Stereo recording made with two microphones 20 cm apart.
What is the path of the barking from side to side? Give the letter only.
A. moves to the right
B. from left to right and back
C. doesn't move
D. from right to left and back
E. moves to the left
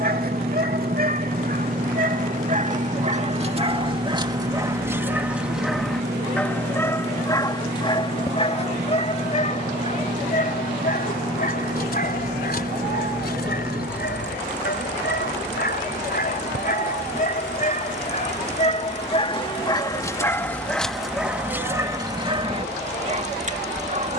D.